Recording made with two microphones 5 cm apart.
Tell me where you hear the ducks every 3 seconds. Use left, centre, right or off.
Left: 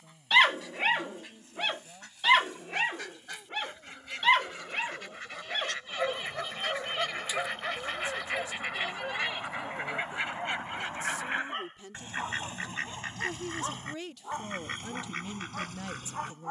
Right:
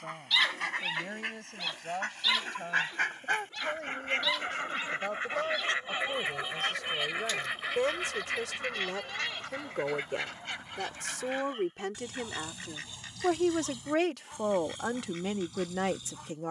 right, right, centre, left, left, left.